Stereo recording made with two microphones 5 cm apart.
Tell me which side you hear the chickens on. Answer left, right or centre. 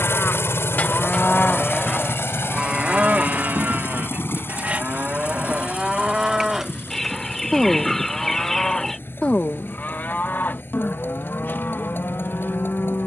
centre.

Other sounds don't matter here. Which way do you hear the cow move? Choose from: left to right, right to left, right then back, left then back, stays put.
right then back.